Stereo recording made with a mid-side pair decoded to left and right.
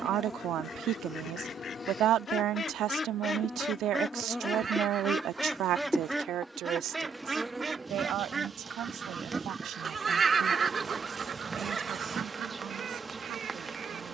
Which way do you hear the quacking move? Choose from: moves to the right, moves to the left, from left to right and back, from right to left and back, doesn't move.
moves to the right.